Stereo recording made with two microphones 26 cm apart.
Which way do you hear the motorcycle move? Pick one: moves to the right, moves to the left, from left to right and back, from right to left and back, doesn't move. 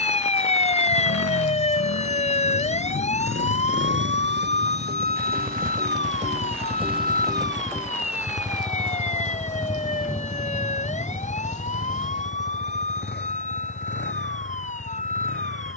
moves to the left.